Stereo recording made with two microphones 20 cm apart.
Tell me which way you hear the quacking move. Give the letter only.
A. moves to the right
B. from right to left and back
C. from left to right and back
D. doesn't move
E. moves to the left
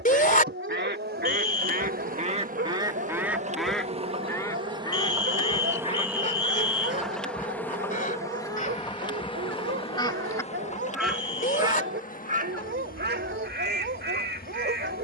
B.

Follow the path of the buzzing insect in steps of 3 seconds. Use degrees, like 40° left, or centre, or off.
50° right, 30° right, 10° left, 30° left, 50° left.